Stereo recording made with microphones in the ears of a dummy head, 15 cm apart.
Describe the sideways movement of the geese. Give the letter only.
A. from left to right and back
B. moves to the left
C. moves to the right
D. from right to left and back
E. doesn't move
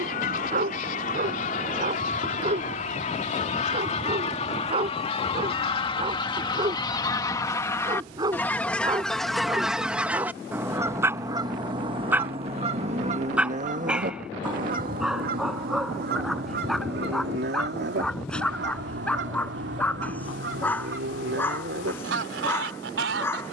C.